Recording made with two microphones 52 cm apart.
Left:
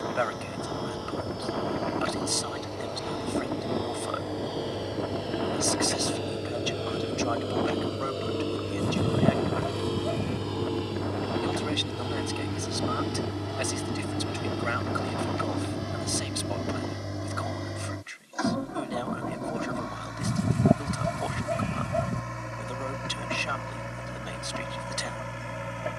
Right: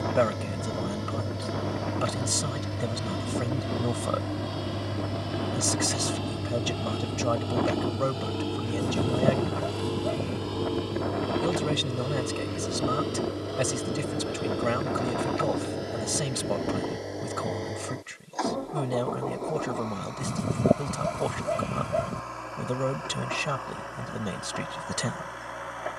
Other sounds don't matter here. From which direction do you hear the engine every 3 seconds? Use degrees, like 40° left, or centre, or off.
40° right, 30° right, 20° right, centre, 20° left, 30° left, 40° left, 40° left, 50° left.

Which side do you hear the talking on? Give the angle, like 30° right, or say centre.
70° right.